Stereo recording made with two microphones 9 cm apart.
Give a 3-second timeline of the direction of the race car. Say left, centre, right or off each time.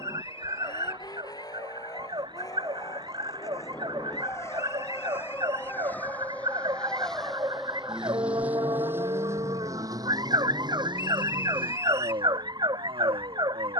left, left, centre, right, right.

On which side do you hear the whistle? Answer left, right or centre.
right.